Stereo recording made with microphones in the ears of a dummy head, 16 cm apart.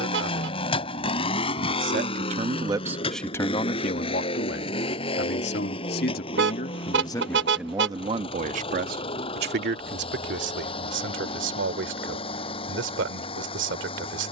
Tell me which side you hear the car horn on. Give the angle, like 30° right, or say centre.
70° right.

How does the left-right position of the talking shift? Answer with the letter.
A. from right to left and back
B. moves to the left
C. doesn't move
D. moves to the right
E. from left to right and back
A.